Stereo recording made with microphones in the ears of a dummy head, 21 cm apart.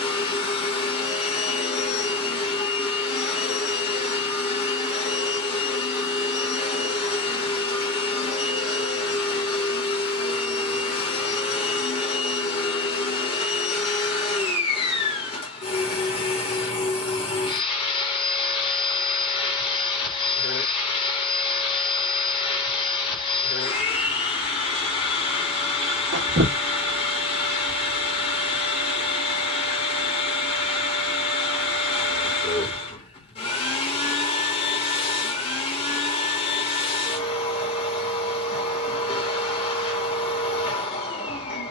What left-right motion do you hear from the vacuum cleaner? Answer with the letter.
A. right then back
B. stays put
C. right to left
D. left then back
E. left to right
B.